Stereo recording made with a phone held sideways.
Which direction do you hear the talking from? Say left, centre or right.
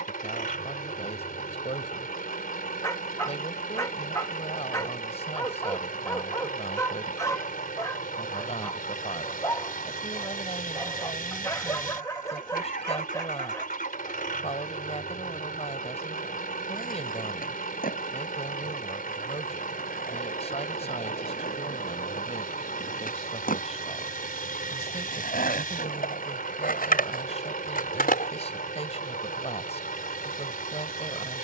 left.